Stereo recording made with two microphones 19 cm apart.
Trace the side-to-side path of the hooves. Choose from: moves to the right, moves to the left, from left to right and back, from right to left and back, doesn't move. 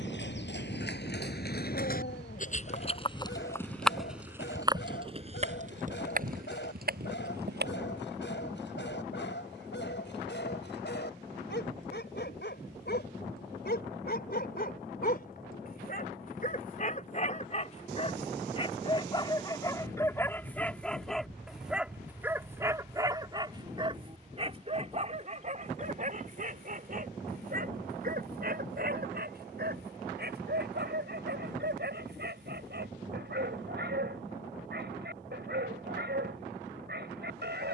moves to the right.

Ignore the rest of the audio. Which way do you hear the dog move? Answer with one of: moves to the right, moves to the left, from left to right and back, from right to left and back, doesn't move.
moves to the right.